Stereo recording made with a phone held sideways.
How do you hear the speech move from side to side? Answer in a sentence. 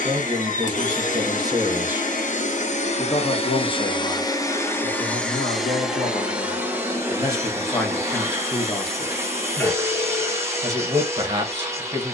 You can hear the speech move from right to left and back again.